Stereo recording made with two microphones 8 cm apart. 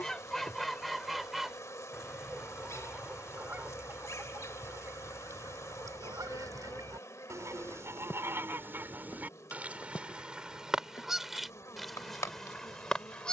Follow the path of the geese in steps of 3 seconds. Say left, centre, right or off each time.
centre, right, right, centre, centre.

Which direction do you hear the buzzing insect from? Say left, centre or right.
left.